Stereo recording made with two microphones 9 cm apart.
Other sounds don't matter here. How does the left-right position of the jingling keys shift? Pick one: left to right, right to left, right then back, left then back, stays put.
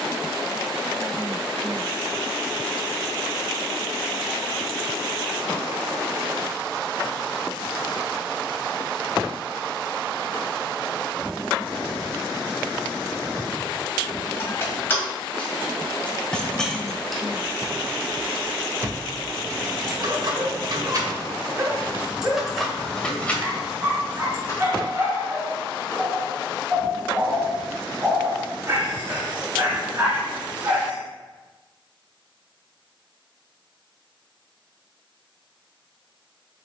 right then back.